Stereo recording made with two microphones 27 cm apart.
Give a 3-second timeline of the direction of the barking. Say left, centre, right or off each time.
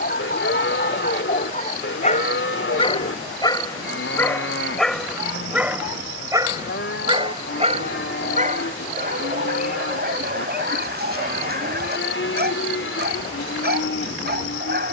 left, centre, right, right, right.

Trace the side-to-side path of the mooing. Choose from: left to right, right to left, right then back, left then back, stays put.
stays put.